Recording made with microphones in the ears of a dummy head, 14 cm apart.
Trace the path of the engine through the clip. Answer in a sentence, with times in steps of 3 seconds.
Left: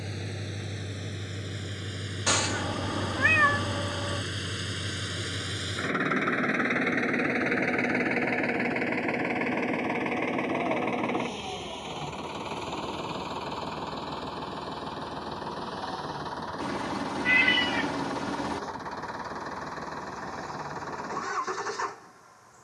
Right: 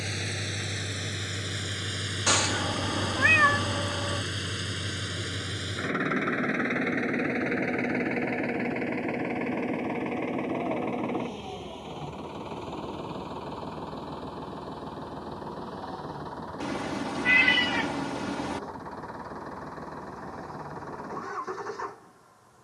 You can hear the engine on the right from 0 s, in the centre from 3 s and on the left from 6 s.